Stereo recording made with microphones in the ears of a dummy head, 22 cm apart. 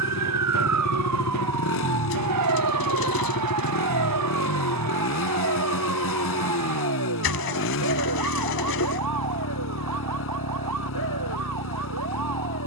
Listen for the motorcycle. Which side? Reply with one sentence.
You can hear the motorcycle on the left.